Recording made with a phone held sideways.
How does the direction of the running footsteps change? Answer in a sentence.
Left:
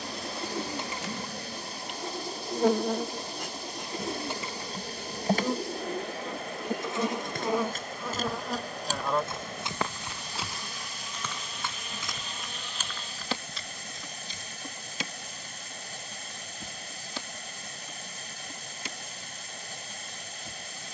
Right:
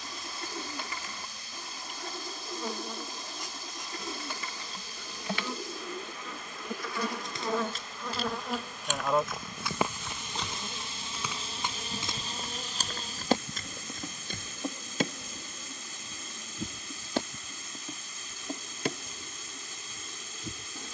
In this clip you hear the running footsteps move to the right.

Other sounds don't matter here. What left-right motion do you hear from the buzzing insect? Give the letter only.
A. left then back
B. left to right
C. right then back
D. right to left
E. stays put
B.